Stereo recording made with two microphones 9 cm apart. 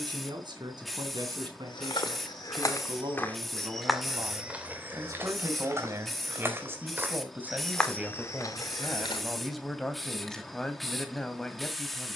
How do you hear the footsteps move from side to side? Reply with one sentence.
In this clip you hear the footsteps move from left to right and back again.